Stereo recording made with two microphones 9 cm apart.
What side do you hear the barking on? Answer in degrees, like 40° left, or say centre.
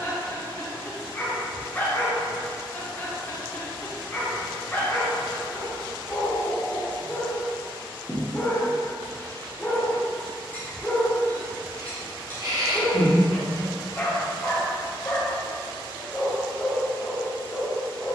20° left.